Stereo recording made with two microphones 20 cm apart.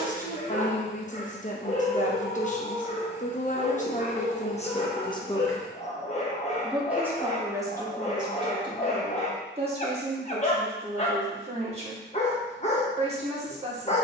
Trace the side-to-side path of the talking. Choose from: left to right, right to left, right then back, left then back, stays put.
left to right.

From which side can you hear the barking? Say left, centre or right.
left.